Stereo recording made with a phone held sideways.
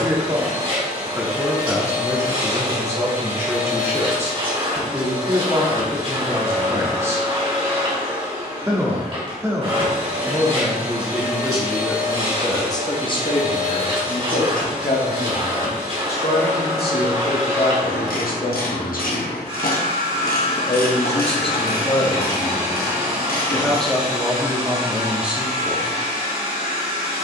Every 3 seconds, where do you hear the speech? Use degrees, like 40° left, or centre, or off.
20° right, 20° right, 20° right, 10° right, 40° left, 70° left, 60° left, 20° left, 10° right.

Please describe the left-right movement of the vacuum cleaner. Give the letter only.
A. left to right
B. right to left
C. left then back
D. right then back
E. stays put
E.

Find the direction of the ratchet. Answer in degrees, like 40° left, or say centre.
70° left.